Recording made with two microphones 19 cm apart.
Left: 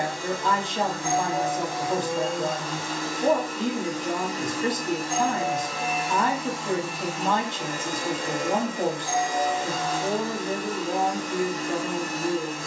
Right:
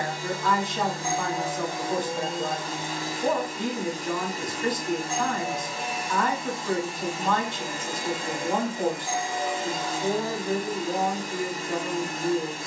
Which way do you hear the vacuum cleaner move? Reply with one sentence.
In this clip you hear the vacuum cleaner stay put.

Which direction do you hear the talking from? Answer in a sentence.
In this clip you hear the talking on the left.